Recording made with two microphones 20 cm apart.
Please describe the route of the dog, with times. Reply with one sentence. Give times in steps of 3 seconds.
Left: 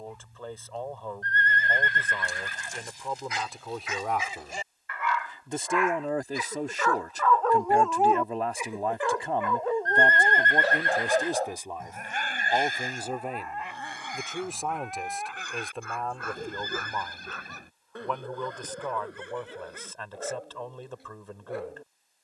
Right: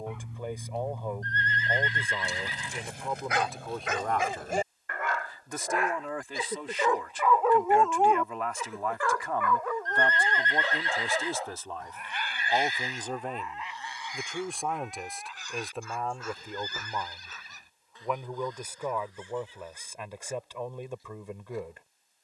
You can hear the dog on the right from 0 s, in the centre from 6 s and on the left from 9 s.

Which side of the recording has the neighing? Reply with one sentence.
In this clip you hear the neighing on the left.